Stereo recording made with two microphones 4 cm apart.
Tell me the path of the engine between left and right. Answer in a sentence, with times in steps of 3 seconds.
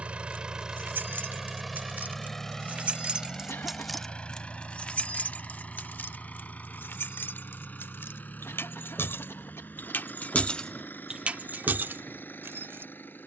In this clip you hear the engine in the centre from 0 s and on the left from 3 s.